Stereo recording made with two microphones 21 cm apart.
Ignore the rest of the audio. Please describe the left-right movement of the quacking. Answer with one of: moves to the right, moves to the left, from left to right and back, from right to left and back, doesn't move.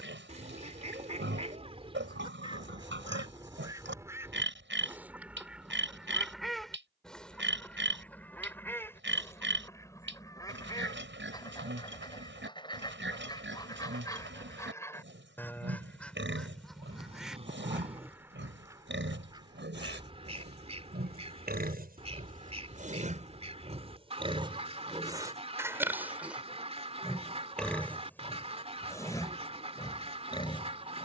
from right to left and back.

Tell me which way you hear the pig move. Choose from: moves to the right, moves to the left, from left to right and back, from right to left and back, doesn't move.
moves to the left.